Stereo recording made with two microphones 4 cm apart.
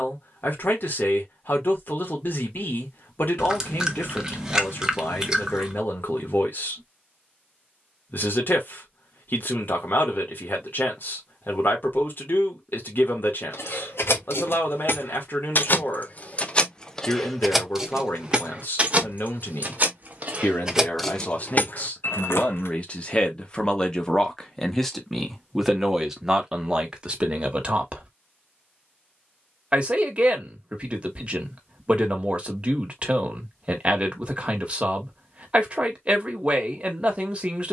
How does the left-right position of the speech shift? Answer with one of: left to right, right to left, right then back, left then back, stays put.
left to right.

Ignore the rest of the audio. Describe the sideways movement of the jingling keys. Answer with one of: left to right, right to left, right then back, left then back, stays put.
right then back.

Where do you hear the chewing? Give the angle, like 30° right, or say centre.
20° right.